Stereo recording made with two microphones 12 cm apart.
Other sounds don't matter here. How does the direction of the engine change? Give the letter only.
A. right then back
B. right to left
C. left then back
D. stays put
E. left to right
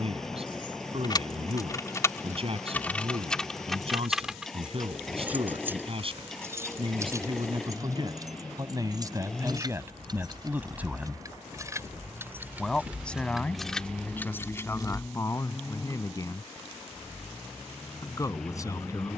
D.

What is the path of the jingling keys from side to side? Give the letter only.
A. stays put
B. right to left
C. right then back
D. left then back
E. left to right
C.